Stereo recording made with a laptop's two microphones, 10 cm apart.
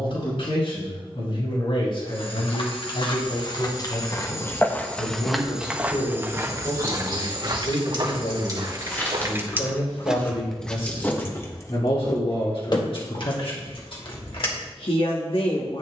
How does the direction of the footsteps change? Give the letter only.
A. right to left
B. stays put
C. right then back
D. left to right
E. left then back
D.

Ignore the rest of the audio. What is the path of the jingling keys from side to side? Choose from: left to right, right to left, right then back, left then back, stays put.
right to left.